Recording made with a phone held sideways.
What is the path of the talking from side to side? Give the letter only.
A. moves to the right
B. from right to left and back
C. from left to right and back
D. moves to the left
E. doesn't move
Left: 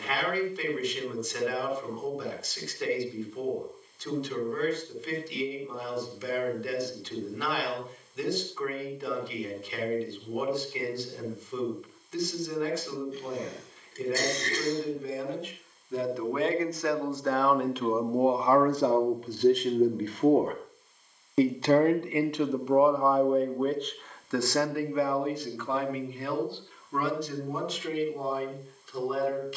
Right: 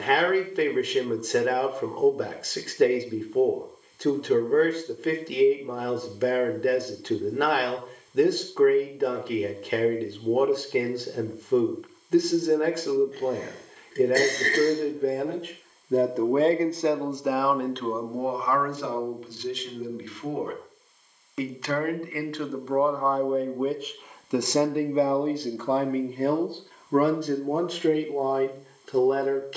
B.